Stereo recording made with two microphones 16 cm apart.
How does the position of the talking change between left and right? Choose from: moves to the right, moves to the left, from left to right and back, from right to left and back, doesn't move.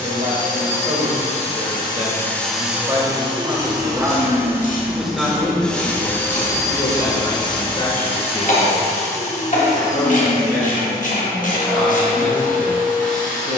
moves to the left.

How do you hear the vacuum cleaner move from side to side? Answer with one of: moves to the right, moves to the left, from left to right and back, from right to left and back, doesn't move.
from left to right and back.